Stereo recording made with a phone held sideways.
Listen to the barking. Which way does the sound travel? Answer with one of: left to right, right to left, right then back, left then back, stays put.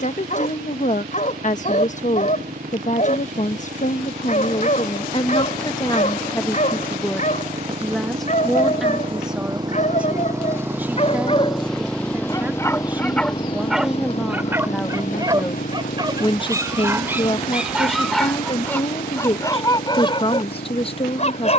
right then back.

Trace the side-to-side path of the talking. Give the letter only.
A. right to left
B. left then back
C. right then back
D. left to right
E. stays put
C.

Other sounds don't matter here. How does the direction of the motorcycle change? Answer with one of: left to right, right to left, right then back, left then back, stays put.
right to left.